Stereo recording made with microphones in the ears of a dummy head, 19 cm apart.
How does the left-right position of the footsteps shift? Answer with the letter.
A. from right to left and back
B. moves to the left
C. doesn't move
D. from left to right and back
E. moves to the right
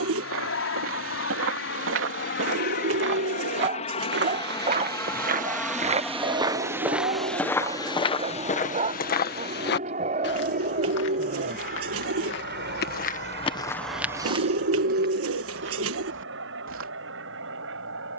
A.